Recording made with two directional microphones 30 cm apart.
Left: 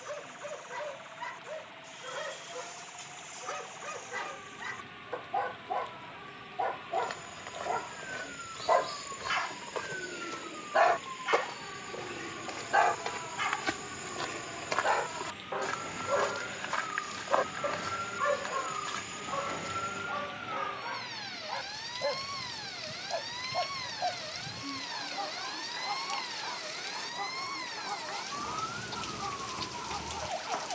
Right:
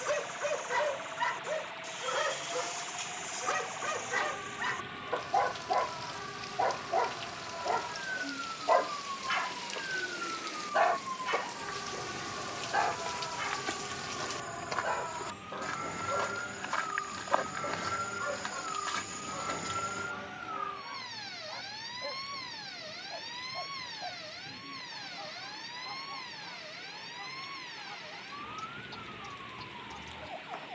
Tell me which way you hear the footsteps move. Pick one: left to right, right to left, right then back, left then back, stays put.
left to right.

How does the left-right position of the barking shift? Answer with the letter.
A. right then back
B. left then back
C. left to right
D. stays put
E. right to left
E.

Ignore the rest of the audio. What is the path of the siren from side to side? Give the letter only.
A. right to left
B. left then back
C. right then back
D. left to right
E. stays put
A.